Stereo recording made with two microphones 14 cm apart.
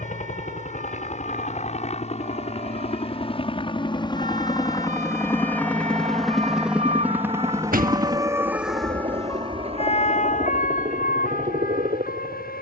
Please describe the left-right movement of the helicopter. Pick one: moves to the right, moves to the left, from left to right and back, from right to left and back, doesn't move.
moves to the right.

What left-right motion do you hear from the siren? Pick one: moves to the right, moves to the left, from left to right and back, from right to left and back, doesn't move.
moves to the left.